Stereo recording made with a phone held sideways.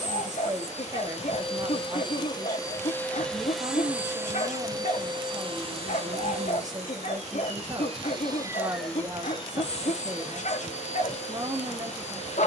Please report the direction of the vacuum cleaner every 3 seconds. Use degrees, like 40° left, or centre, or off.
40° left, 20° right, 40° right, 50° left.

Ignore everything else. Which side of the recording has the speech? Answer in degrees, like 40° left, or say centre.
30° right.